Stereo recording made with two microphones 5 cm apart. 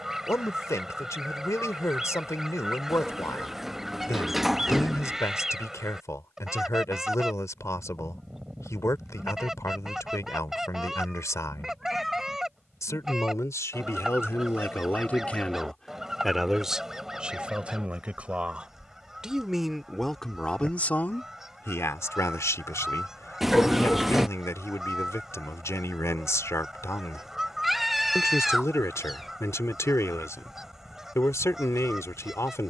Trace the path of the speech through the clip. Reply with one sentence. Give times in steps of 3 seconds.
In this clip you hear the speech on the left from 0 s, in the centre from 15 s and on the left from 21 s.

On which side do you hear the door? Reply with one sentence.
In this clip you hear the door in the centre.